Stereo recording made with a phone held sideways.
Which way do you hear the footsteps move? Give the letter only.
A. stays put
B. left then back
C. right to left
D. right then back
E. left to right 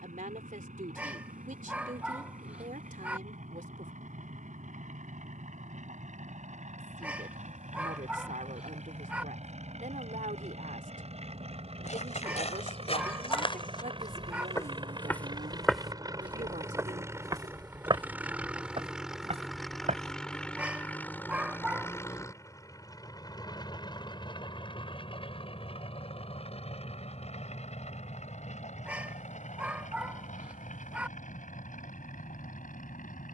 E.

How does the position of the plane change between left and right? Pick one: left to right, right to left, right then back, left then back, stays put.
right to left.